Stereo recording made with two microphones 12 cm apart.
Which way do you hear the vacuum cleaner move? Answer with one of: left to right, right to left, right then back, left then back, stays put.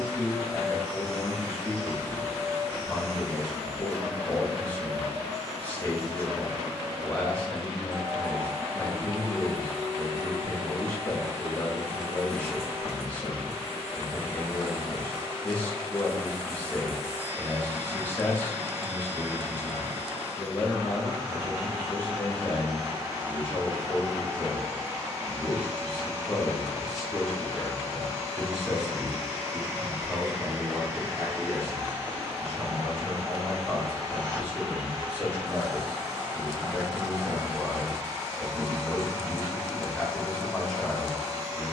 stays put.